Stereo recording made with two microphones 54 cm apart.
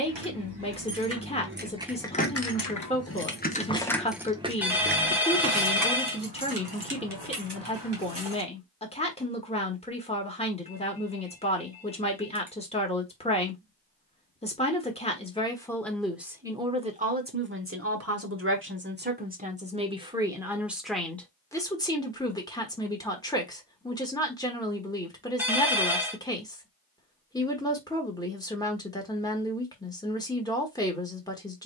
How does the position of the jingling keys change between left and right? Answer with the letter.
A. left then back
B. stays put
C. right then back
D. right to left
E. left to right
A.